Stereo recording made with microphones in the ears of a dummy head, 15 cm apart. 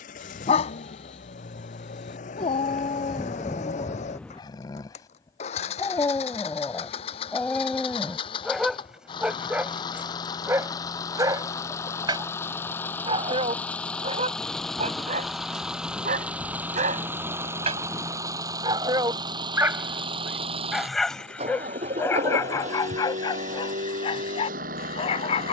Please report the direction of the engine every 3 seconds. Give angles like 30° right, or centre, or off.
50° left, 40° left, 30° left, 20° left, 10° left, 10° right, 30° right, 40° right, 50° right.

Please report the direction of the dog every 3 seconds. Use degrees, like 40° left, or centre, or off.
40° left, 30° left, 10° left, 10° right, 30° right, 40° right, 10° right, 20° left, 30° left.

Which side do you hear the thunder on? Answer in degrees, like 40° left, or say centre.
10° left.